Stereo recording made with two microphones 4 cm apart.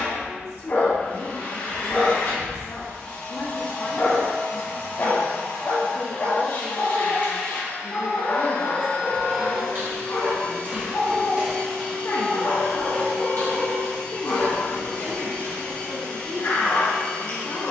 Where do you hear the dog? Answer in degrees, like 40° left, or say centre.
50° left.